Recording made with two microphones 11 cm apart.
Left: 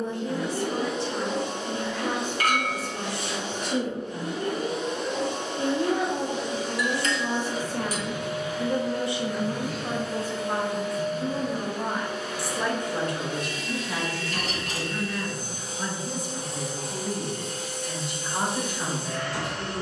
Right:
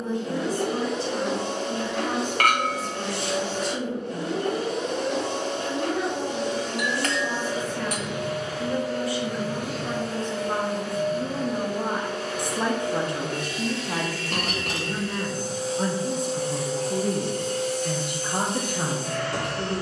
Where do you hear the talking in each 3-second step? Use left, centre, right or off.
left, left, left, centre, right, right, right.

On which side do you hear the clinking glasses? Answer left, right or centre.
right.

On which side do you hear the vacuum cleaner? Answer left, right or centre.
right.